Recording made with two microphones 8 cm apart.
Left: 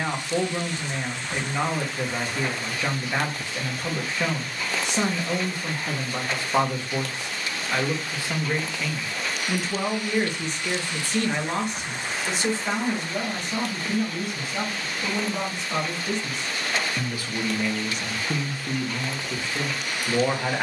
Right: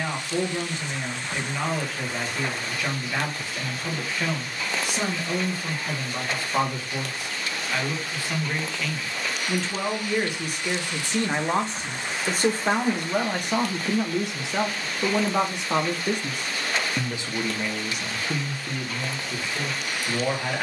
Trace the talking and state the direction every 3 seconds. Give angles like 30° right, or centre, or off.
20° left, 20° left, 20° left, 10° right, 60° right, 50° right, 10° left.